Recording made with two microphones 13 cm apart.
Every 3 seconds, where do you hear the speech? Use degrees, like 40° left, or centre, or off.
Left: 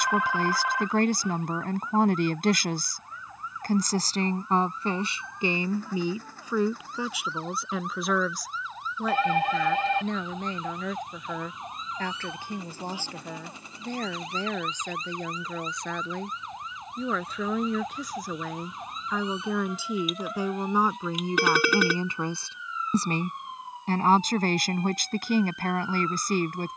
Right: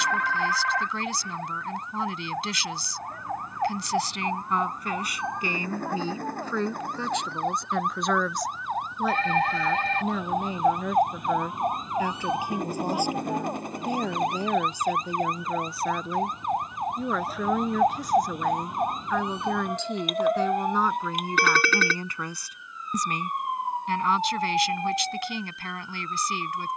50° left, 30° left, 10° left, 10° right, 10° right, 10° right, 10° left, 20° left, 40° left.